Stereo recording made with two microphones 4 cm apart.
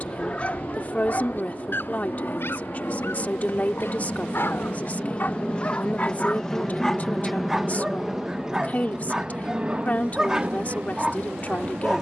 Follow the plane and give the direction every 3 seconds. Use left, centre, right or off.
left, left, centre, right.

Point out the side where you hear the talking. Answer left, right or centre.
left.